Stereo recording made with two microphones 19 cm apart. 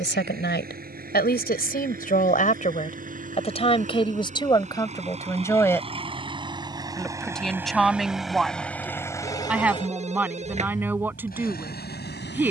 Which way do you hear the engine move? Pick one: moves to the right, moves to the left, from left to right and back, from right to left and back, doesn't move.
moves to the left.